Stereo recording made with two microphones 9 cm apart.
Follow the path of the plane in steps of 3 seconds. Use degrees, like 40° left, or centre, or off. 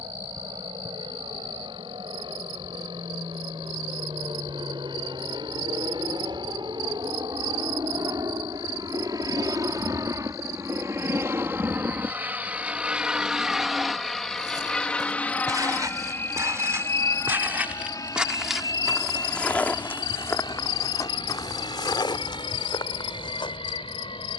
70° right, 60° right, 50° right, 30° right, centre, 30° left, 50° left, 60° left.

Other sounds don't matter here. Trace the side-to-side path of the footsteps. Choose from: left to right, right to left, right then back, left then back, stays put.
right to left.